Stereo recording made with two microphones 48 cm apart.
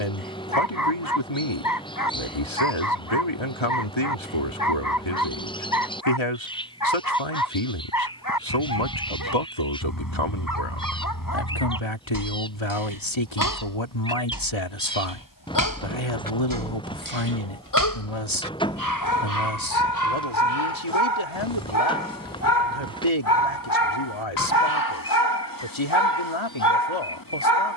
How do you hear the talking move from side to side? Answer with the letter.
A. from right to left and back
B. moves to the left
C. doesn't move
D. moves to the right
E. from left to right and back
C.